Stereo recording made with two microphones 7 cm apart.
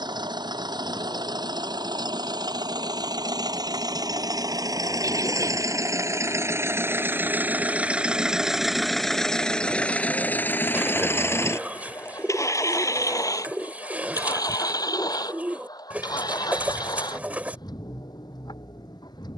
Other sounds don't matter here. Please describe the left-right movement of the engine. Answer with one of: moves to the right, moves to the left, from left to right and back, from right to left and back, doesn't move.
moves to the left.